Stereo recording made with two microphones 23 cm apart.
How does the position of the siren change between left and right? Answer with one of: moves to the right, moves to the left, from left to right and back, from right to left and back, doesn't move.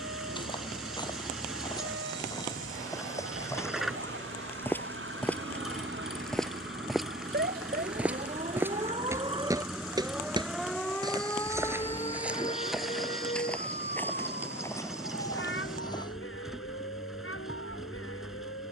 moves to the left.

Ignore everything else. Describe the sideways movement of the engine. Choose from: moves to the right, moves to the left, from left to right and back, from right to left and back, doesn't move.
doesn't move.